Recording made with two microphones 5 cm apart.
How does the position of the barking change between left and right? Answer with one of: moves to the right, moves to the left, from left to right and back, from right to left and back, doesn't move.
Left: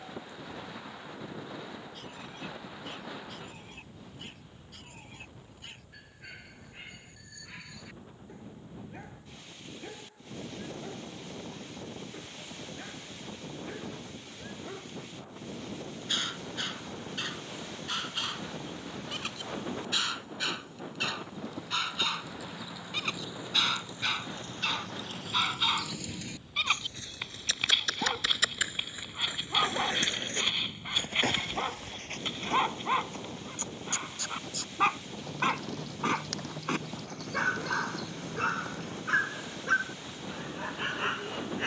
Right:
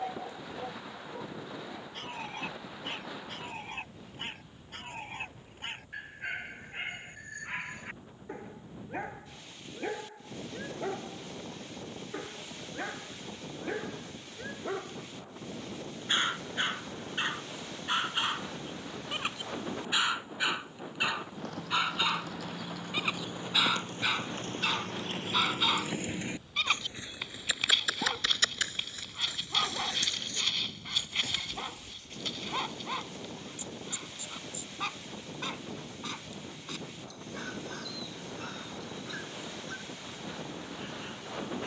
moves to the left.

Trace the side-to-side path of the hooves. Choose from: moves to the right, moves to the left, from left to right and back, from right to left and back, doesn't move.
moves to the left.